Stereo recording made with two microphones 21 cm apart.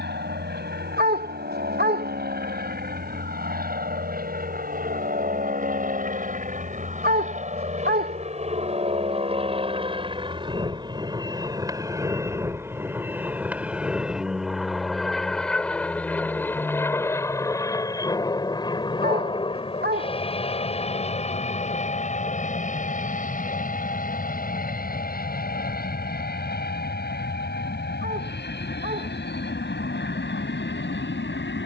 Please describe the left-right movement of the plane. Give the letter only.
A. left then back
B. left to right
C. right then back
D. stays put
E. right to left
E.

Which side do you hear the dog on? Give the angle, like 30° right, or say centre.
50° right.